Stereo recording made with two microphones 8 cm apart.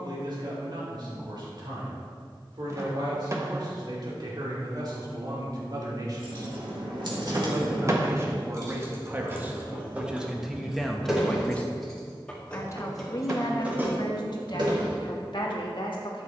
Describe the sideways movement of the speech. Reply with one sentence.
You can hear the speech move to the left.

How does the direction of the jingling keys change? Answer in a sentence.
You can hear the jingling keys move from right to left and back again.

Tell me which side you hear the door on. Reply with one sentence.
In this clip you hear the door on the right.